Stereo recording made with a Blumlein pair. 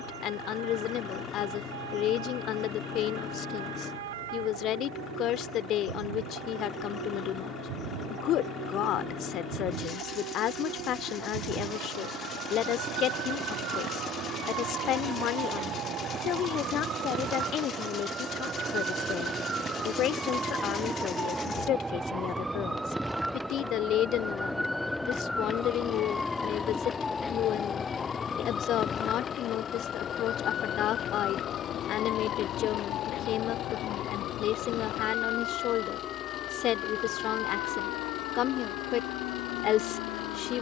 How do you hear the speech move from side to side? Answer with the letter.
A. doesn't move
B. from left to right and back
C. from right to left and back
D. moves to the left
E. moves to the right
A.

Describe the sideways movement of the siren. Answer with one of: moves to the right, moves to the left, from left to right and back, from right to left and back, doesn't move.
moves to the left.